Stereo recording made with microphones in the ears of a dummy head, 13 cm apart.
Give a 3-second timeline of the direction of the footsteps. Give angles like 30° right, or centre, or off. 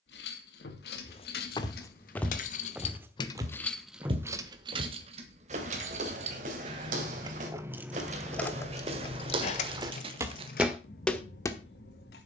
20° left, 40° right, 50° right, 20° right.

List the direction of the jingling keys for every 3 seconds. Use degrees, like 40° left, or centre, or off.
70° left, 20° right, 10° right, 60° left.